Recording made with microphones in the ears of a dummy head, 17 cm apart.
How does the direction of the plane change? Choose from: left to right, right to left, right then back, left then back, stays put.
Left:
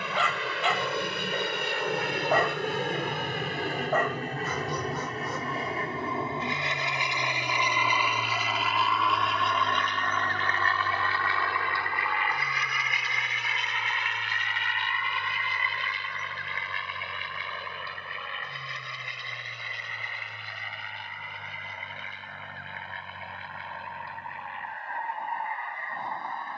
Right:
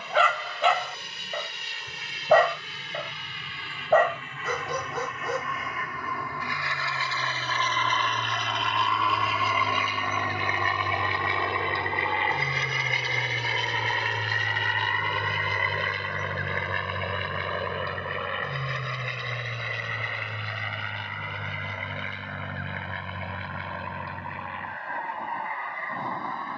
left to right.